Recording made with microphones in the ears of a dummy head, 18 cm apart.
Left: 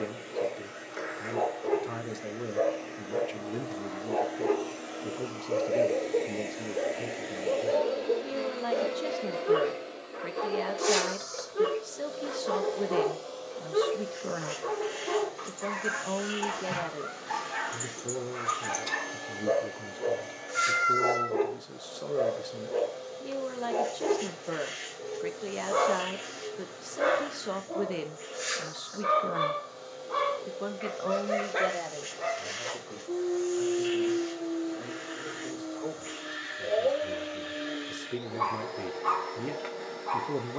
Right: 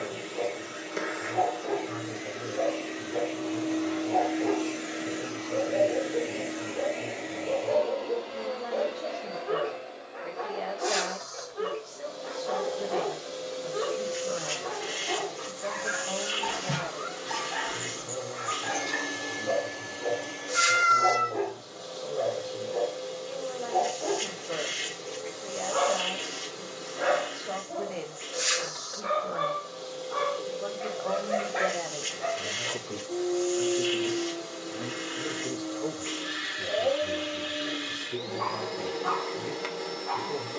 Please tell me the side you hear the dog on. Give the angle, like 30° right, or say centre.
60° left.